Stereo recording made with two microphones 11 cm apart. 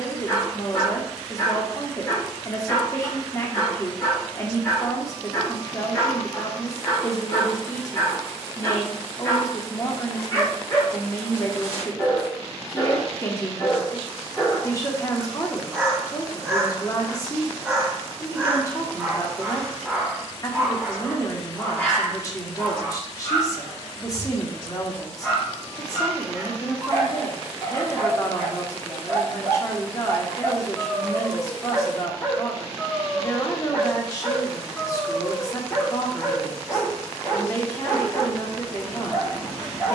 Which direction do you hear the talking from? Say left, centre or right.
left.